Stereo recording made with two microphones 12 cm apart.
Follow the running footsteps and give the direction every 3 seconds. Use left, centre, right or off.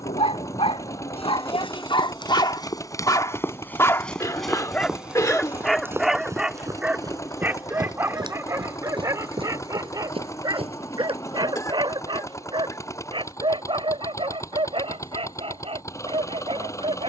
left, centre, right, right, off, off.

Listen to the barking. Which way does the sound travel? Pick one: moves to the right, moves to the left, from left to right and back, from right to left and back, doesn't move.
moves to the right.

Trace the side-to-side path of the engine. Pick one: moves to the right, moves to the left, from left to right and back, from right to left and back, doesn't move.
doesn't move.